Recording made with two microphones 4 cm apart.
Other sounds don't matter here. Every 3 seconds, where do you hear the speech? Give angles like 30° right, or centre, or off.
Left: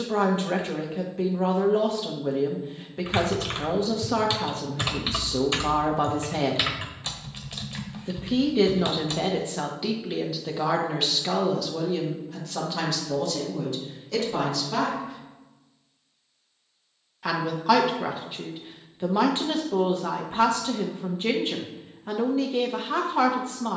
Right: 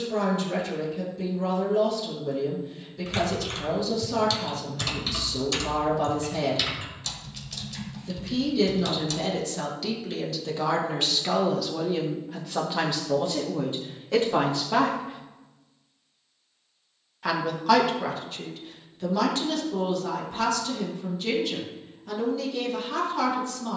50° left, 50° left, 40° left, 10° left, 20° right, centre, 30° left, 40° left.